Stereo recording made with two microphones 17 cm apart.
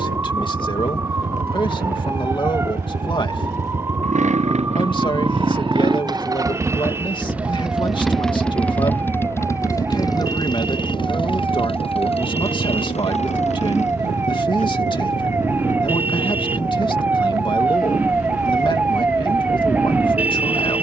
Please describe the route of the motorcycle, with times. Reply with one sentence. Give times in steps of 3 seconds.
In this clip you hear the motorcycle on the right from 0 s, in the centre from 6 s and on the left from 9 s.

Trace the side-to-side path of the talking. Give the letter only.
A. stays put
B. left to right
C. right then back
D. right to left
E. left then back
A.